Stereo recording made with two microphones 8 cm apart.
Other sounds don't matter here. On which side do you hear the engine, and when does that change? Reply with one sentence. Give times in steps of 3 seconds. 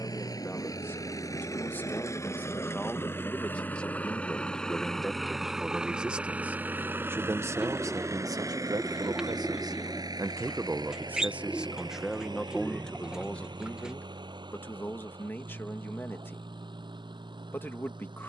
In this clip you hear the engine on the left from 0 s, in the centre from 3 s and on the right from 6 s.